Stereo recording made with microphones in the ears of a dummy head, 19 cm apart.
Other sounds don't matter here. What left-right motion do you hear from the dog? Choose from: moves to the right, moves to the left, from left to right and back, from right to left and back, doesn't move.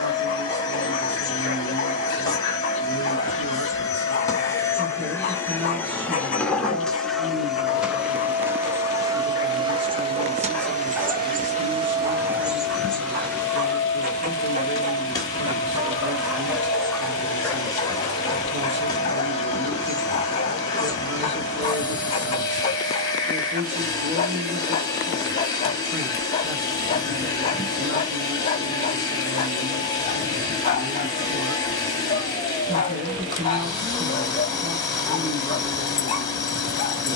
from left to right and back.